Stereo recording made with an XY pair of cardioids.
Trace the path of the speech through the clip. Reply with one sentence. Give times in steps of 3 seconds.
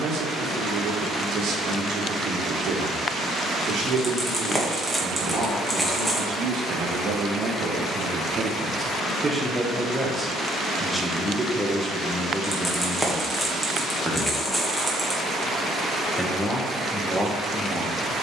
In this clip you hear the speech on the right from 0 s and in the centre from 9 s.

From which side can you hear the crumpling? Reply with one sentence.
You can hear the crumpling in the centre.